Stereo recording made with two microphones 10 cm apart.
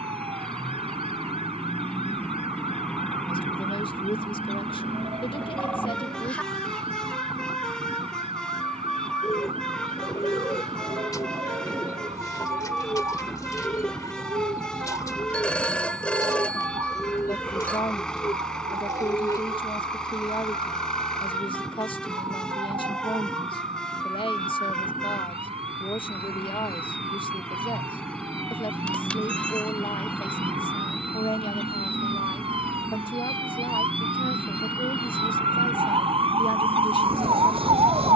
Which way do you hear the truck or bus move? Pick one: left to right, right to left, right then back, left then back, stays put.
stays put.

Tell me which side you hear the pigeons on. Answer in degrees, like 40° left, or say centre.
40° left.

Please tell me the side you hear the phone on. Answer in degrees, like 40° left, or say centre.
10° left.